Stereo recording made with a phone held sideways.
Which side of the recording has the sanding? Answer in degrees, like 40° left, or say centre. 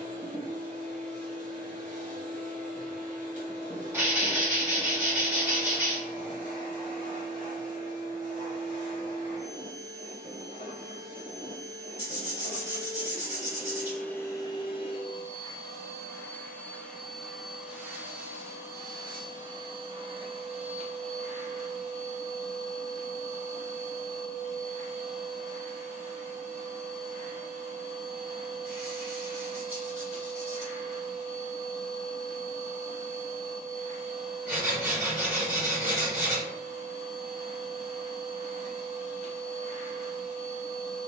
10° right.